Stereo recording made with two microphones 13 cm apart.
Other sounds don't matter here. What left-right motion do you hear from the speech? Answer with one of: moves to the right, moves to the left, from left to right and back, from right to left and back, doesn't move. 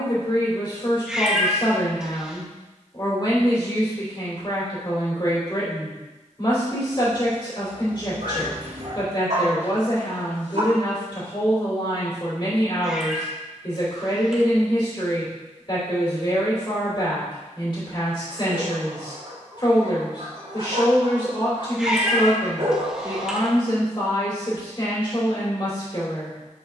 doesn't move.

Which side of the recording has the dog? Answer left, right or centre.
right.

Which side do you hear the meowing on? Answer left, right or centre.
centre.